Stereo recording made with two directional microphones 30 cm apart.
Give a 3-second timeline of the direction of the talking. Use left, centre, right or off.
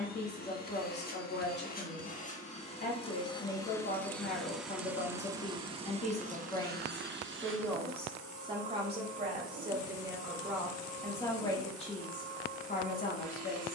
left, left, centre, centre, left.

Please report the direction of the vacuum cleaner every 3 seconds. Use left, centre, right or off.
left, centre, right, right, right.